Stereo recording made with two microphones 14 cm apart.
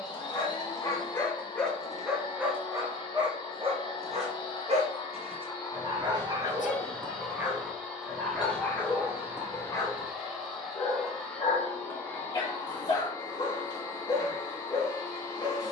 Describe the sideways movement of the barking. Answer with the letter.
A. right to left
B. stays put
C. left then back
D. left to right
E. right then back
E.